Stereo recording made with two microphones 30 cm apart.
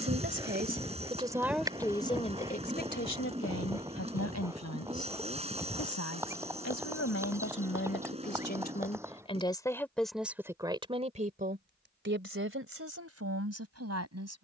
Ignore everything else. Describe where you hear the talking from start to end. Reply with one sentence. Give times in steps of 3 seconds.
In this clip you hear the talking in the centre from 0 s, on the left from 3 s, in the centre from 9 s and on the right from 12 s.